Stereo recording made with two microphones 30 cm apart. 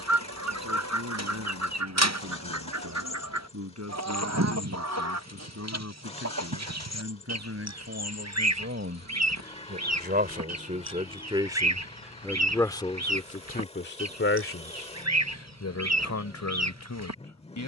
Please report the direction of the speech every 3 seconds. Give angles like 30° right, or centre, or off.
60° right, 60° right, 50° right, 20° right, 30° left, 70° left.